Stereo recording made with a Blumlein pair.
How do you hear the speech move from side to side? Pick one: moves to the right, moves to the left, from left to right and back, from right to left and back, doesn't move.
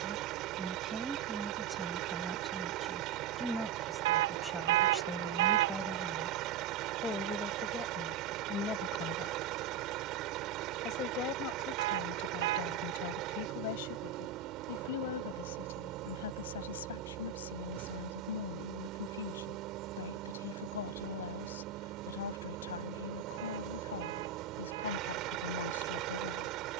moves to the left.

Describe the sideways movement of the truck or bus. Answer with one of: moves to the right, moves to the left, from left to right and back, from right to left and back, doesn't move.
doesn't move.